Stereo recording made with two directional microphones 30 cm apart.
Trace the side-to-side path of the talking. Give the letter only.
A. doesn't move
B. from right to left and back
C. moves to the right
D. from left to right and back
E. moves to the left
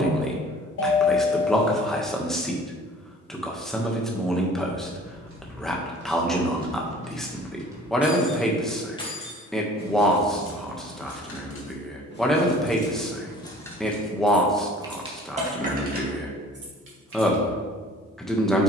A.